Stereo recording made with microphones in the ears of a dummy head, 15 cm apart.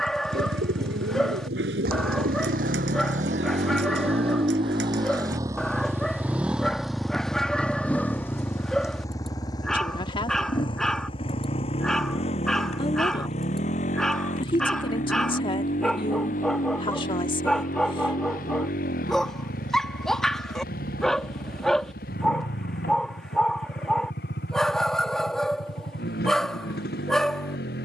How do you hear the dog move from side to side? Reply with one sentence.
You can hear the dog stay in one place.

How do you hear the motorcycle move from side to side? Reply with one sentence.
You can hear the motorcycle move from right to left.